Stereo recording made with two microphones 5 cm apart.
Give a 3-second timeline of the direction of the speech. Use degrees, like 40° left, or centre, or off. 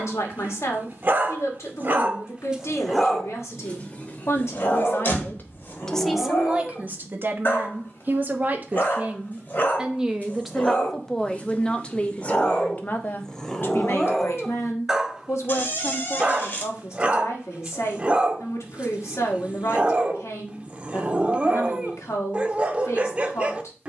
70° left, 60° left, 30° right, centre, 40° left, 70° left, 70° left, 70° left.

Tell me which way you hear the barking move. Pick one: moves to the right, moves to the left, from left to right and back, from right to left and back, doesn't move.
from right to left and back.